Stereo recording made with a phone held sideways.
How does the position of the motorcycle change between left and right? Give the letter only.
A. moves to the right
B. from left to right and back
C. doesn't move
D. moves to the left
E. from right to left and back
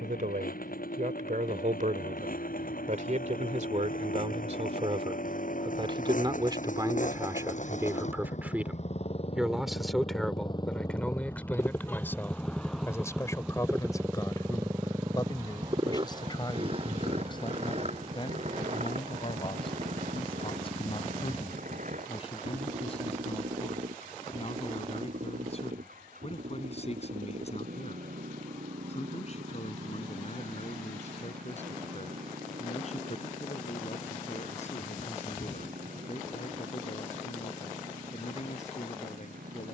A.